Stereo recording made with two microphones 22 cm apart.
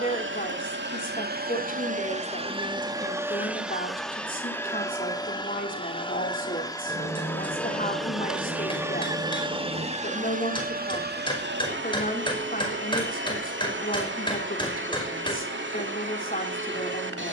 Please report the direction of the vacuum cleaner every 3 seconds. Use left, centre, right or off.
right, centre, centre, right, right, right.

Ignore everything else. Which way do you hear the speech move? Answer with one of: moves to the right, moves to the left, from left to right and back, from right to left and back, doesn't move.
doesn't move.